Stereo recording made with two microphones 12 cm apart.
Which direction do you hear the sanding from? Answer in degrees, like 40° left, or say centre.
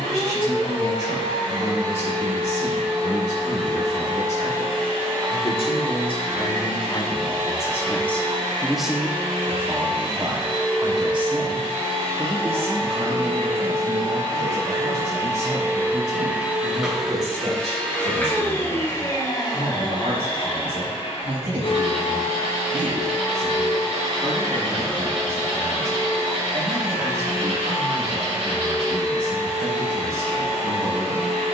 60° right.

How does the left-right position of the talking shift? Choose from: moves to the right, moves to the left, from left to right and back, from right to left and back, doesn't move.
moves to the right.